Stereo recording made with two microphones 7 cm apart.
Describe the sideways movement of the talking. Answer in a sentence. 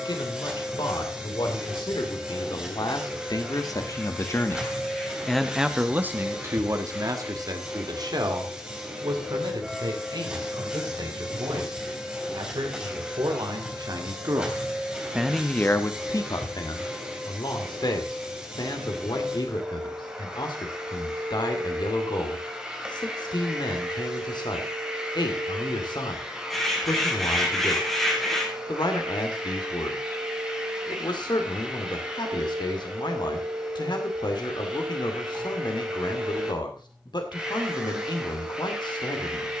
In this clip you hear the talking go right and come back.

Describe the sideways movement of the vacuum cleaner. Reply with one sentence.
You can hear the vacuum cleaner stay in one place.